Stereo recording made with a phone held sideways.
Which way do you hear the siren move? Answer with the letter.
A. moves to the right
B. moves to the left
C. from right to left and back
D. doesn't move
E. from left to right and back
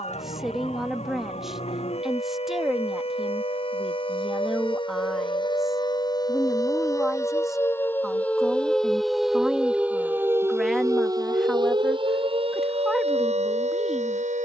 A.